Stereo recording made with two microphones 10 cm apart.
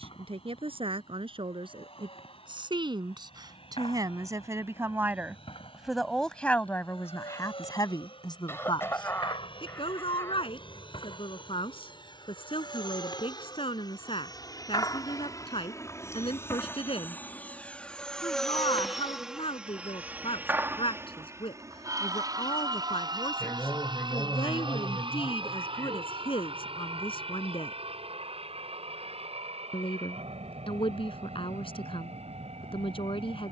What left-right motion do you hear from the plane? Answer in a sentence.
In this clip you hear the plane go from the left side to the right.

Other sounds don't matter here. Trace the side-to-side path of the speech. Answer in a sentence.
You can hear the speech go from the right side to the left.